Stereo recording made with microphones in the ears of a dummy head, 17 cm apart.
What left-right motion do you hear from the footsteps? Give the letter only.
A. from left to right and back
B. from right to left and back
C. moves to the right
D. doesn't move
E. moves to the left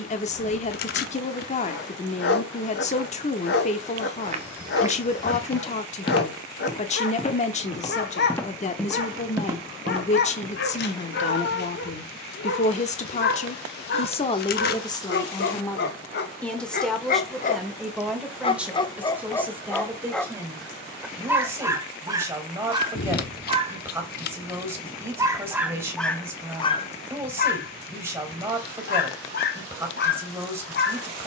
B.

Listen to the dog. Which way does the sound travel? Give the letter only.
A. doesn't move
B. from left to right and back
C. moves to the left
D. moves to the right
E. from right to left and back
B.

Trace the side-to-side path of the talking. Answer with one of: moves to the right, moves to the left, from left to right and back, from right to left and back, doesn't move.
moves to the right.